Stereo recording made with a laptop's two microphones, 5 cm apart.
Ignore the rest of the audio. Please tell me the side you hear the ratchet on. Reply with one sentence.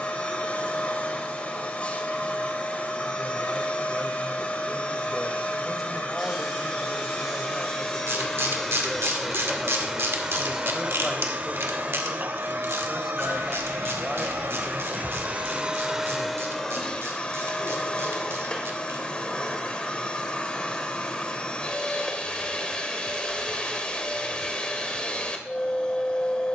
In this clip you hear the ratchet on the right.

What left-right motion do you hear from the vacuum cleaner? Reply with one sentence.
In this clip you hear the vacuum cleaner move from left to right and back again.